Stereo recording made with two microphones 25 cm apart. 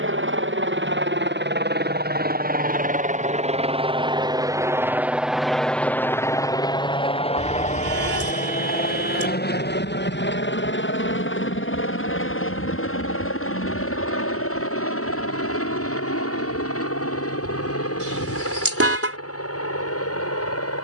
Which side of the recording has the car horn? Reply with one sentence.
You can hear the car horn on the right.